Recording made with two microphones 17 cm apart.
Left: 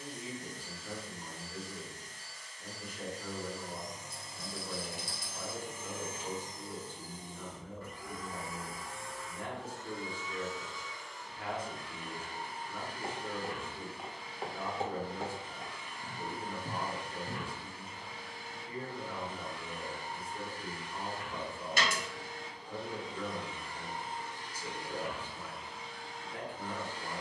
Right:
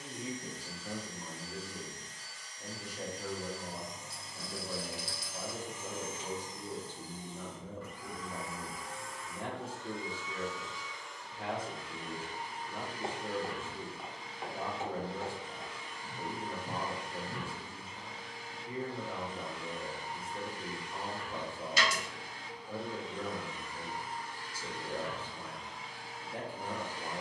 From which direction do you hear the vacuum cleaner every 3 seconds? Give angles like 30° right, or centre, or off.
50° left, 50° left, 50° left, 50° left, 50° left, 50° left, 50° left, 40° left, centre.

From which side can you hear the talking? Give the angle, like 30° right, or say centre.
30° right.